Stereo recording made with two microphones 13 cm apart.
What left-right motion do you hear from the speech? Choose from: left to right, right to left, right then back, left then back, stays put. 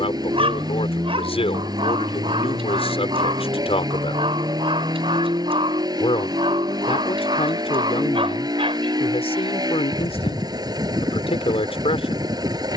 stays put.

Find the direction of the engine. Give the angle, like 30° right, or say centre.
30° right.